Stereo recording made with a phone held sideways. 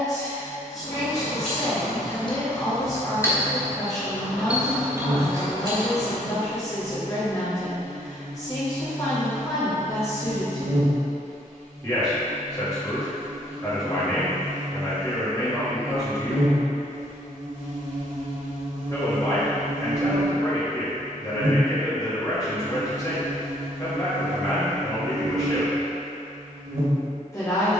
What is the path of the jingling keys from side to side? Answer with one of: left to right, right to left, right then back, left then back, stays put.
left to right.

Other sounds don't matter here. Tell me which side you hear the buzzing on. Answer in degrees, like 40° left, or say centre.
50° right.